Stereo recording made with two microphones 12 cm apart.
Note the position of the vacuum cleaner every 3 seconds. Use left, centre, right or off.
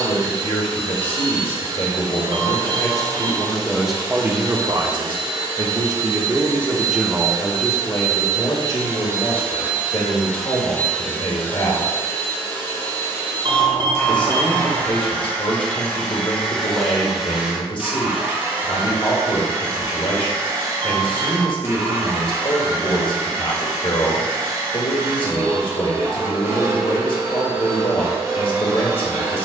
right, right, right, centre, left, centre, right, right, right, right.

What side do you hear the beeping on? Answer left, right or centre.
right.